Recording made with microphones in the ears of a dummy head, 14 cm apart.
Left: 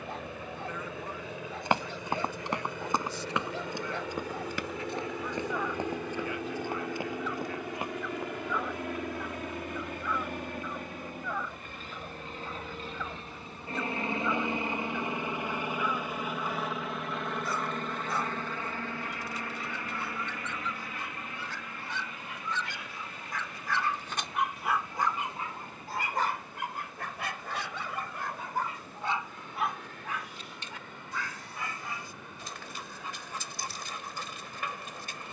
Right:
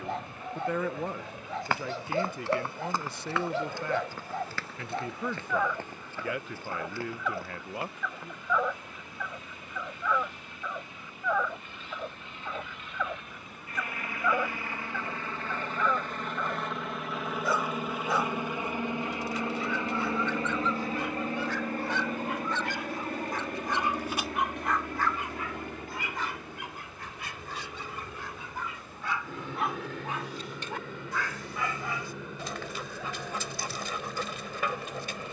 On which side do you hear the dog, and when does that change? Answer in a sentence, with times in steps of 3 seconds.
You can hear the dog on the right from 0 s, on the left from 24 s and on the right from 30 s.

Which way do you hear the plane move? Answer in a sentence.
You can hear the plane go from the left side to the right.